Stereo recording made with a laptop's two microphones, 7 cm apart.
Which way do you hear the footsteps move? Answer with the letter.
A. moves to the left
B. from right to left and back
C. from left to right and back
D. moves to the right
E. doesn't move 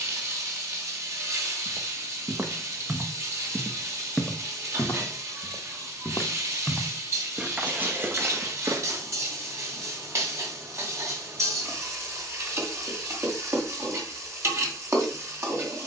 B.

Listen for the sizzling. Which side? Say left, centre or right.
right.